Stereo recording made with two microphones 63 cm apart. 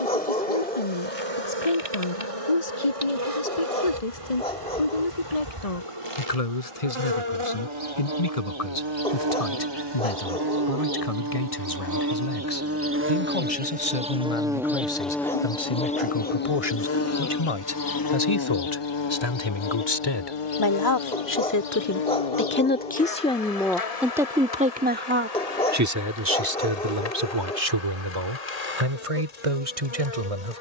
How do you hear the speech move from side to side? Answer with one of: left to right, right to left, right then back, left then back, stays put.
left to right.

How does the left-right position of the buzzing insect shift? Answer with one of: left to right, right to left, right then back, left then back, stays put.
right to left.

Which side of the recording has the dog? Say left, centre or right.
centre.